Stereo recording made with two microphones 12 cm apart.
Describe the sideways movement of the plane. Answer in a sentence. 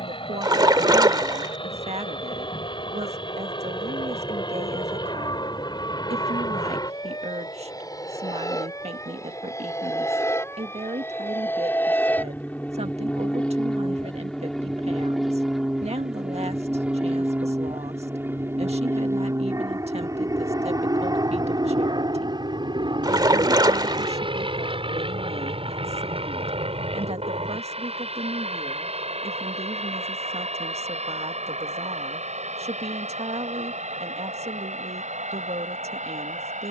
You can hear the plane go from the left side to the right.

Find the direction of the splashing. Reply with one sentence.
In this clip you hear the splashing on the right.